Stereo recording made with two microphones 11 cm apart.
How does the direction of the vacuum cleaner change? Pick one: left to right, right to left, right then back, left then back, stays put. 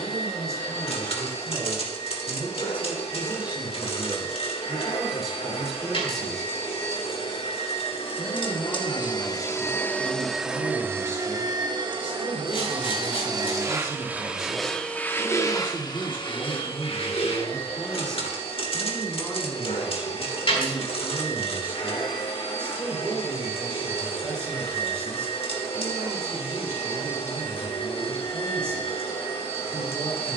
right then back.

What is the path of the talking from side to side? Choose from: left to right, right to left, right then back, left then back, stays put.
left then back.